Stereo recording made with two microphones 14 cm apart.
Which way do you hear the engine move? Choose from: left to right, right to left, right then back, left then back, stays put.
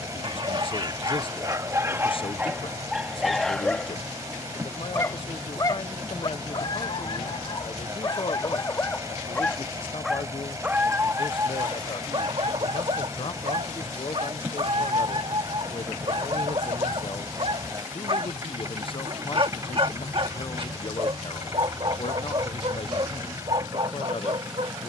stays put.